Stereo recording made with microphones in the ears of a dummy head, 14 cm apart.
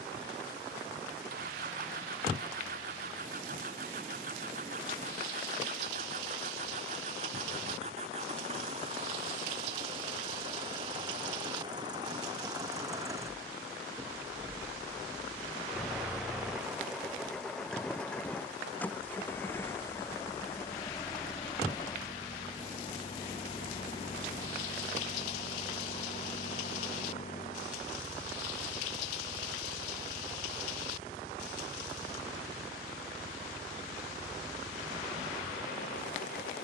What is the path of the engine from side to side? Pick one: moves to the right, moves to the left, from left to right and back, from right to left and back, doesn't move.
moves to the left.